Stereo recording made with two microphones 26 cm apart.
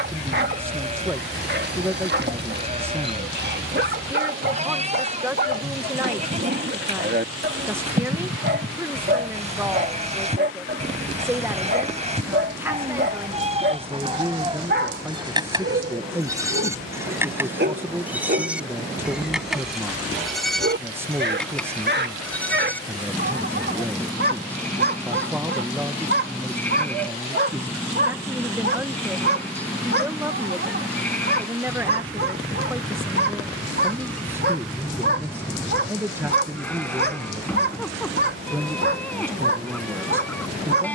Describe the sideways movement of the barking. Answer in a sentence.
You can hear the barking stay in one place.